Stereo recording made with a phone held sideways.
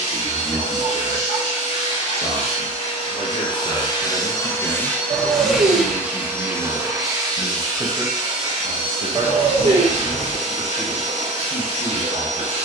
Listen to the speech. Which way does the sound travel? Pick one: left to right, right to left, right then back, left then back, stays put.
left to right.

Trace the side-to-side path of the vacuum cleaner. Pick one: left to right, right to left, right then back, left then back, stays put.
left to right.